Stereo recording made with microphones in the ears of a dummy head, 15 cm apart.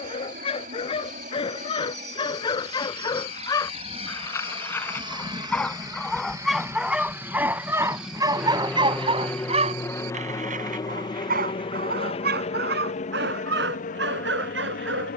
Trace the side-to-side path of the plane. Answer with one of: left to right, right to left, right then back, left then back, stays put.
right to left.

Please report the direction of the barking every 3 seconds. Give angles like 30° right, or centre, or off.
30° left, 20° left, 10° right, 50° right, 70° right.